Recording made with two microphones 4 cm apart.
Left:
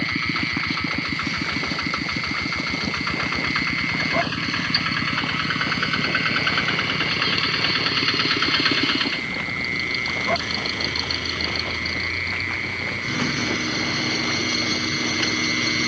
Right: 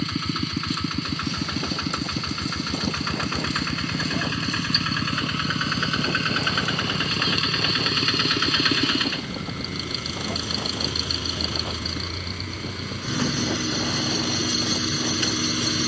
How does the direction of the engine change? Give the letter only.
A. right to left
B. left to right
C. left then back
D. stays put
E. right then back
D.